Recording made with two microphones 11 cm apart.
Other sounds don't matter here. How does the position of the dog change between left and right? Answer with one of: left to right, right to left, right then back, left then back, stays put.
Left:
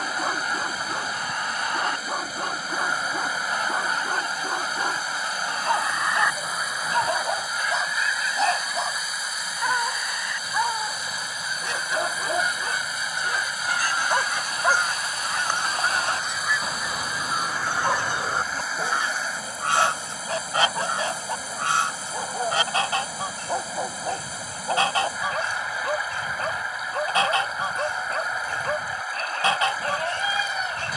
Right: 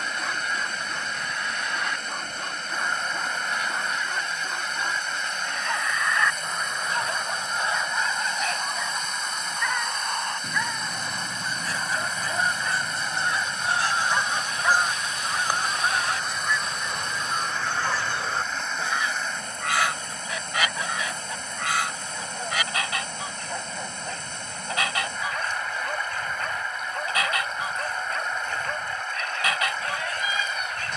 stays put.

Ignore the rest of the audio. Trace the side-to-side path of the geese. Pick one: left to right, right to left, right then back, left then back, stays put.
right then back.